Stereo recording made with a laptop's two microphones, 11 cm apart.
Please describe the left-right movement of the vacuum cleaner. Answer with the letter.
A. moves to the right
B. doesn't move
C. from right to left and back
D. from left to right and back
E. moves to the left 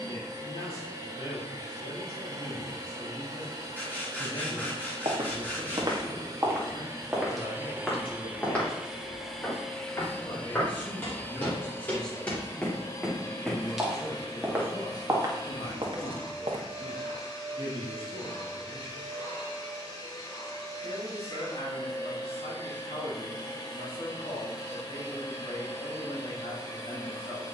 E.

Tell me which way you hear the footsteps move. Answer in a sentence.
In this clip you hear the footsteps go left and come back.